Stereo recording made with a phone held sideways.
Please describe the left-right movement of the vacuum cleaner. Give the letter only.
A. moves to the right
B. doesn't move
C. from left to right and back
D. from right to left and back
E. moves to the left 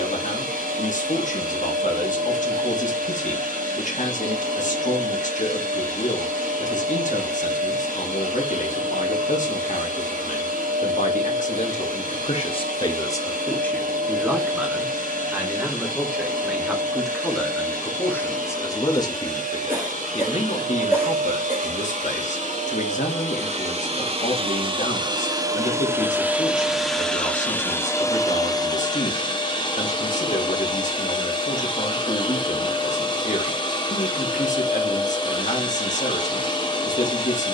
E.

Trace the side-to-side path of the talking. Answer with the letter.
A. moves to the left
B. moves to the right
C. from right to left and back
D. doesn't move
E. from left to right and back
E.